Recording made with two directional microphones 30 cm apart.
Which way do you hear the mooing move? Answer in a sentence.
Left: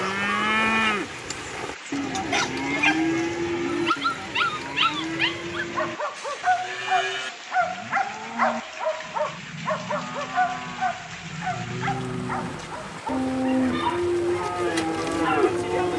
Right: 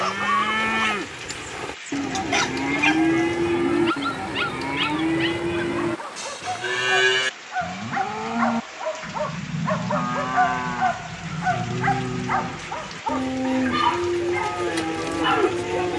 You can hear the mooing move from left to right and back again.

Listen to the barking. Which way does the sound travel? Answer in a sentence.
You can hear the barking move from right to left and back again.